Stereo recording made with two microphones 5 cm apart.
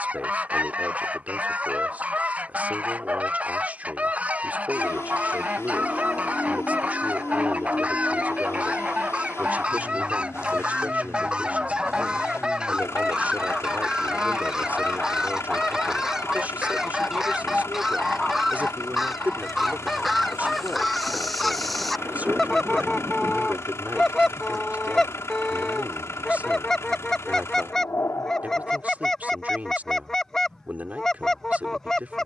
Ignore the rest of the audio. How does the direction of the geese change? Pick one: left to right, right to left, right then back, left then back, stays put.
right to left.